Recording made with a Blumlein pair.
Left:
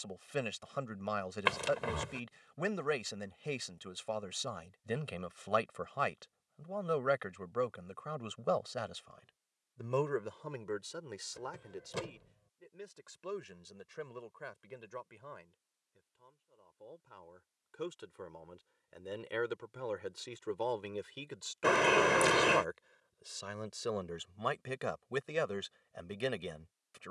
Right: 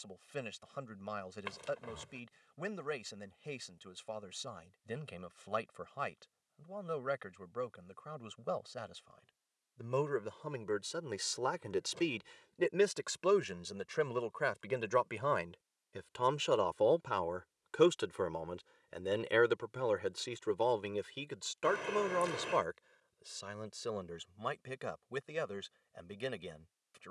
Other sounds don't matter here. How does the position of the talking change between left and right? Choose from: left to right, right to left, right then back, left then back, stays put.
right then back.